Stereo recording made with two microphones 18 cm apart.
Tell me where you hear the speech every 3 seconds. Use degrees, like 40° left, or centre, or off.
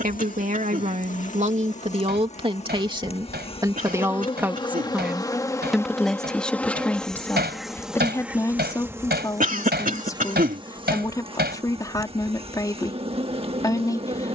40° right, 10° right, 10° left, 20° left, 20° left.